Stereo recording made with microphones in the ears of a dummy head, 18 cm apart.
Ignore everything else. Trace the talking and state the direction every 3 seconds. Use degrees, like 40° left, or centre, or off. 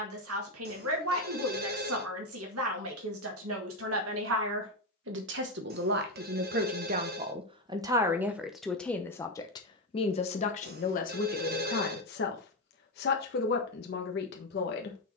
70° right, 60° right, 20° right, 30° left, 50° left.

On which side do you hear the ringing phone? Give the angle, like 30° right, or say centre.
50° right.